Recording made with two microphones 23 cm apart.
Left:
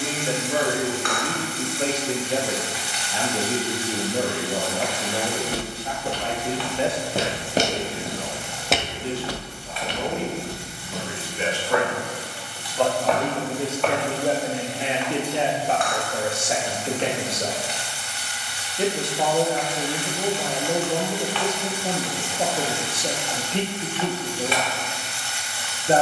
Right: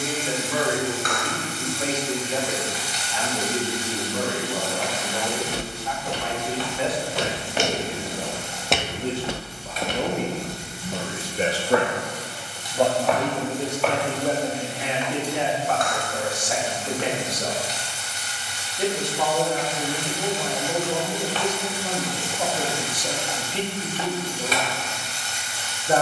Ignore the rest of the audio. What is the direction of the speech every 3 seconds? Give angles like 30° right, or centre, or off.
30° left, 30° left, 10° left, 50° right, 10° left, 30° left, 30° left, 30° left, 30° left.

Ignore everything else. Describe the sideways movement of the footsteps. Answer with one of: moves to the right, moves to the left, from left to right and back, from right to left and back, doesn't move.
moves to the right.